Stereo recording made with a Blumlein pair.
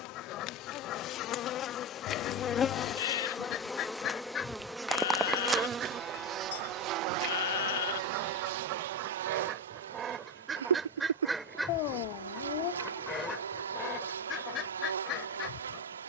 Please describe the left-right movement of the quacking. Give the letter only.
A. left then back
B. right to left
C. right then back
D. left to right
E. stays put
C.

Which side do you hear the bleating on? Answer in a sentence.
You can hear the bleating on the left.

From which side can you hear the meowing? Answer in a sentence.
You can hear the meowing on the left.